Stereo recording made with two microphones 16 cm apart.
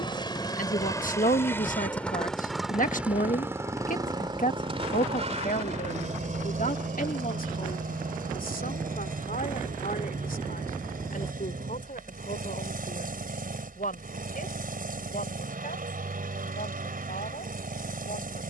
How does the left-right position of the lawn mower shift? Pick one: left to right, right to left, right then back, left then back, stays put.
left to right.